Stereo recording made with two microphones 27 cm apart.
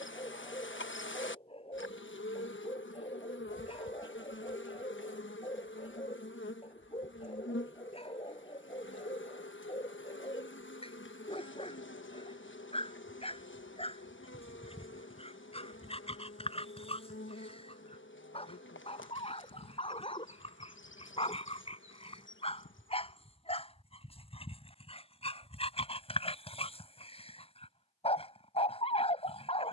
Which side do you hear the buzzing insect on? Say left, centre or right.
left.